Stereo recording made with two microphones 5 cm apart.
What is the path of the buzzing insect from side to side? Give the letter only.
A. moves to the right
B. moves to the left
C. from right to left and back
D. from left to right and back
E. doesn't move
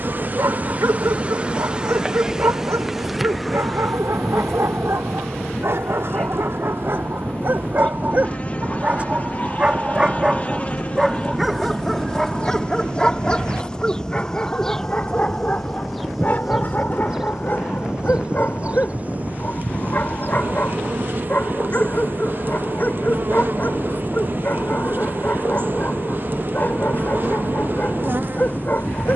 C.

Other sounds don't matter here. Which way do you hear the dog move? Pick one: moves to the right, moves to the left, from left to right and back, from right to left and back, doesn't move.
moves to the left.